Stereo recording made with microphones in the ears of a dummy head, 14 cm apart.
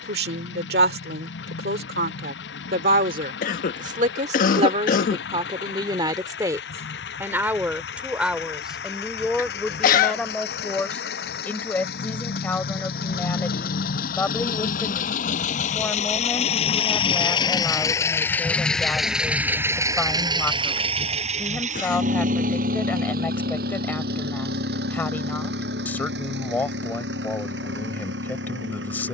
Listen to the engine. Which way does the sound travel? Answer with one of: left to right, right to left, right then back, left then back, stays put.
left to right.